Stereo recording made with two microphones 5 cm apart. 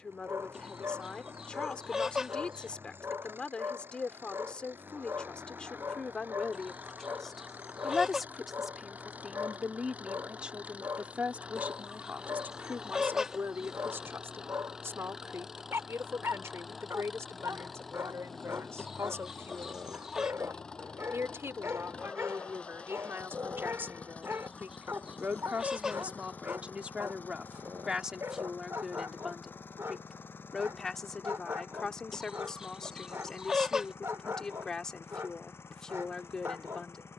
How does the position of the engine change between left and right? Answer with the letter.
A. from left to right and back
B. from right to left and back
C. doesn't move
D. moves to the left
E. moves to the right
D.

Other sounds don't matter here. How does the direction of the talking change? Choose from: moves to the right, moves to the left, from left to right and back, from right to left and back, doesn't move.
from left to right and back.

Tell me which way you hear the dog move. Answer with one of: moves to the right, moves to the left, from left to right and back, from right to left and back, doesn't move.
doesn't move.